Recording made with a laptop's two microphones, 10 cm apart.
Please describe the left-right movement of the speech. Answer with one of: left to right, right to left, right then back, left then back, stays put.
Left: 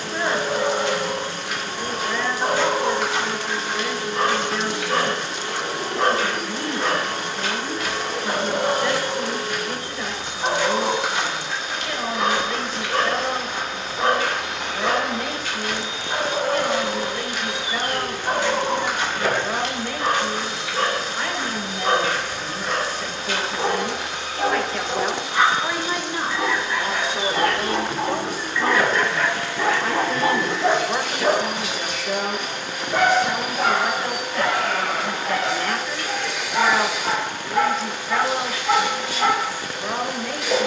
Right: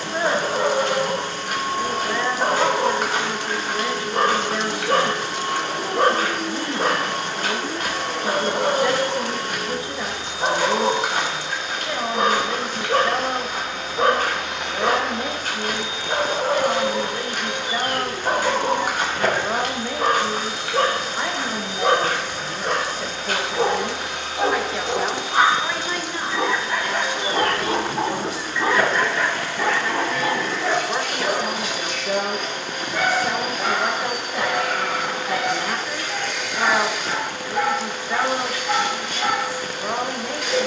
left then back.